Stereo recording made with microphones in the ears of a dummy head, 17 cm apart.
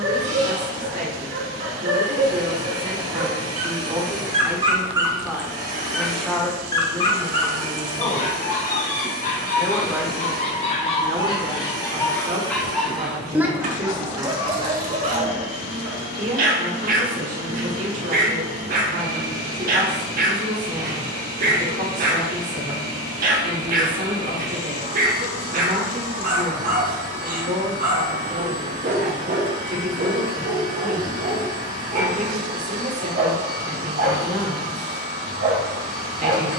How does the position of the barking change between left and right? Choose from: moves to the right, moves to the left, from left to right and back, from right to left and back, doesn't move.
from right to left and back.